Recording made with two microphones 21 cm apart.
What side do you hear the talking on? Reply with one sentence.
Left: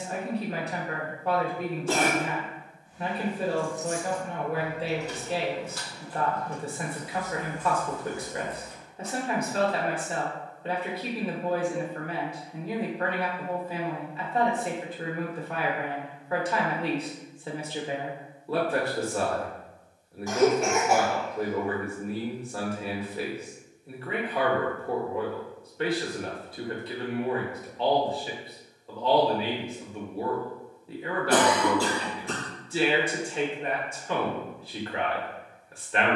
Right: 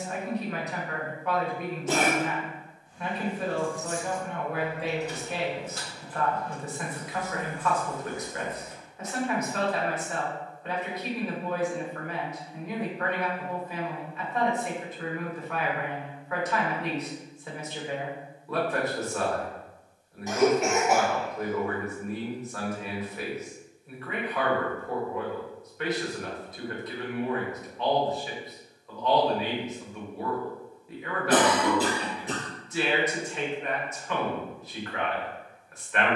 You can hear the talking on the left.